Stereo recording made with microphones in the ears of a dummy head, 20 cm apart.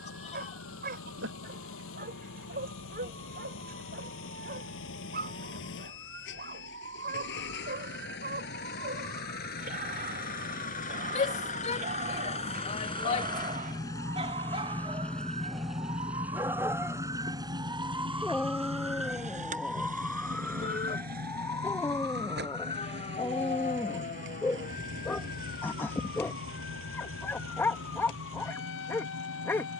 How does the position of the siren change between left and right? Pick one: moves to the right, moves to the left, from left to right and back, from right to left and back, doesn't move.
moves to the left.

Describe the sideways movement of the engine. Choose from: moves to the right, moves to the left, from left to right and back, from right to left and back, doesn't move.
moves to the right.